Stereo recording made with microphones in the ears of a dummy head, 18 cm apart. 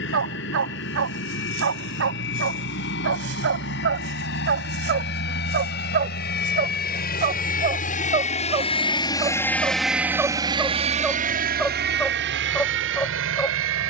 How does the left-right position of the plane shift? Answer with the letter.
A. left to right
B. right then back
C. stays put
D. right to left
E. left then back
A.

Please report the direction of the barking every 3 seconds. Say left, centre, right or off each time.
right, right, right, centre, centre.